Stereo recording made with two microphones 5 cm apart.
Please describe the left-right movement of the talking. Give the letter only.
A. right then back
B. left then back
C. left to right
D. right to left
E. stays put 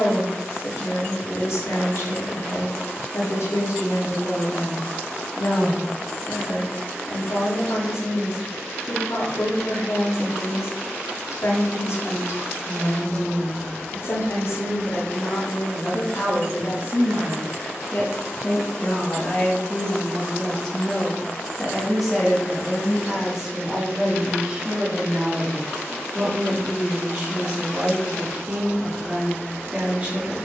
C.